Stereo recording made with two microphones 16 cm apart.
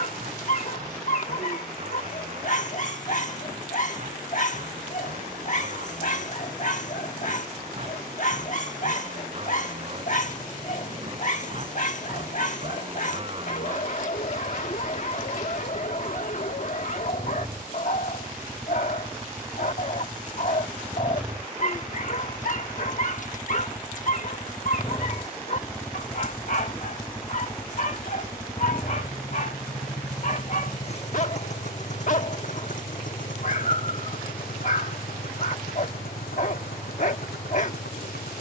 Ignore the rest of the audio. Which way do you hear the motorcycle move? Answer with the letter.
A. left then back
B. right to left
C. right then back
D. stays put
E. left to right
B.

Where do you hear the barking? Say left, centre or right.
left.